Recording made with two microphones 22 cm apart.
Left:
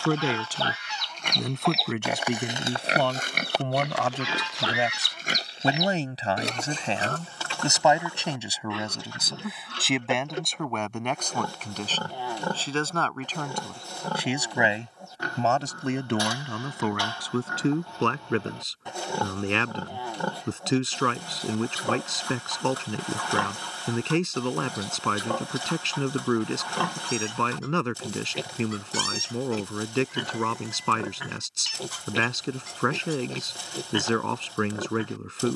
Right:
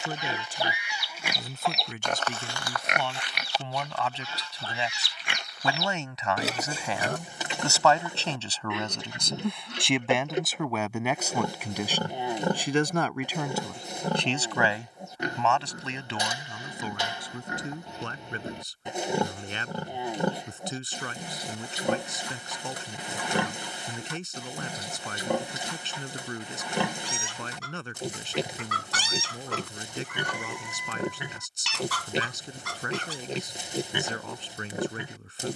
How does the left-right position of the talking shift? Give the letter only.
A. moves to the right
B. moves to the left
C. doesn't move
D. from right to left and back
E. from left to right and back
E.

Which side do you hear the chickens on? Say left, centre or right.
right.